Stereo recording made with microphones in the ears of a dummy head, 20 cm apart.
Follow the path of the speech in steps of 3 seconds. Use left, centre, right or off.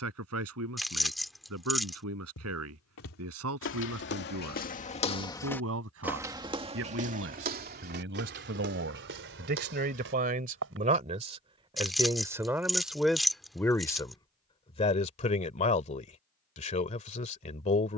right, right, right, right, centre, left.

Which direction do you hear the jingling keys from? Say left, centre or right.
centre.